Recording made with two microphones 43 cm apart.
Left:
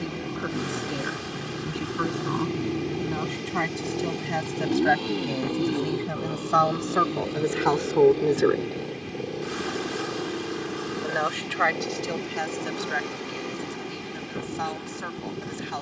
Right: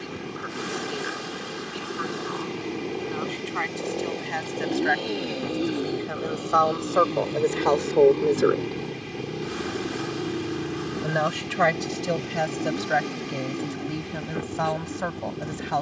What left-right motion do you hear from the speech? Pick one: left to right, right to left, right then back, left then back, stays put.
left to right.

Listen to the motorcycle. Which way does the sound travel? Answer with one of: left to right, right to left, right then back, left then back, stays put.
left to right.